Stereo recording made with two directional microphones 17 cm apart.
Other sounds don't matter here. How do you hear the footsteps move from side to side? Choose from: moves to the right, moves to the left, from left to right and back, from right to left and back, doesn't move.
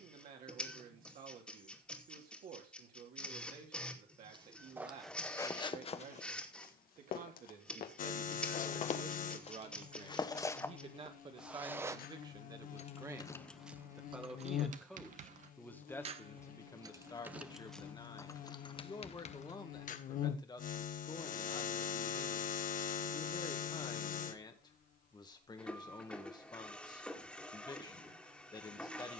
from right to left and back.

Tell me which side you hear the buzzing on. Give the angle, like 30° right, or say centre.
50° left.